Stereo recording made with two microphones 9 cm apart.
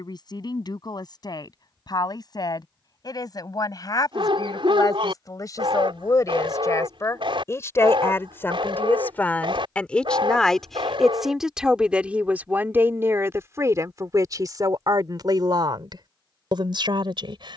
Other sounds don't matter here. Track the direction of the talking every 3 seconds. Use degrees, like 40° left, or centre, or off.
50° left, 50° left, 30° left, 10° left, 30° right, 60° right.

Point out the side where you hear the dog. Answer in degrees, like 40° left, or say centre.
80° right.